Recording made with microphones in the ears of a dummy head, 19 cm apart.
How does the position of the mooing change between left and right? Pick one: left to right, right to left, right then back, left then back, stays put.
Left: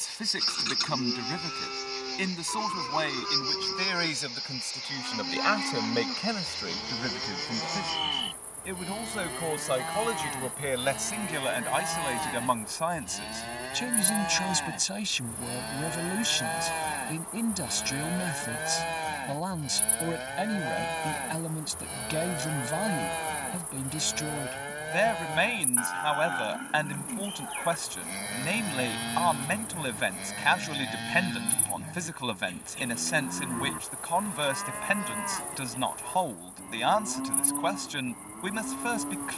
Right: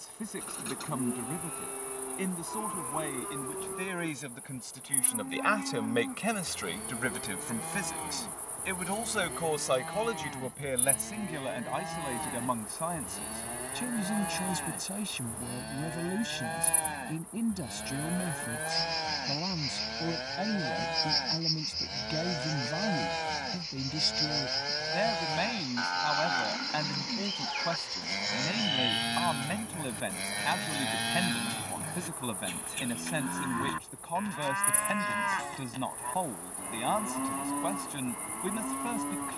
left to right.